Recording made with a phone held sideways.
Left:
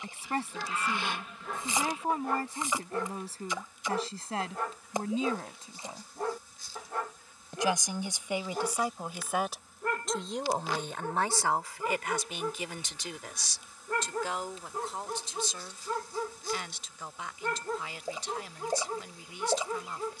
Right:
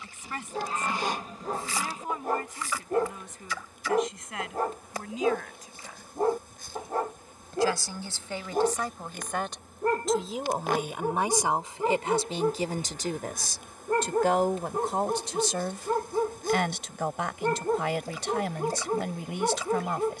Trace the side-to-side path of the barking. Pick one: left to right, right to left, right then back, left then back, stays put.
stays put.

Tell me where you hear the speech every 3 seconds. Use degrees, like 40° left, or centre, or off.
30° left, 30° left, 20° left, 10° right, 50° right, 70° right, 80° right.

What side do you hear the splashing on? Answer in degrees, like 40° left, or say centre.
20° left.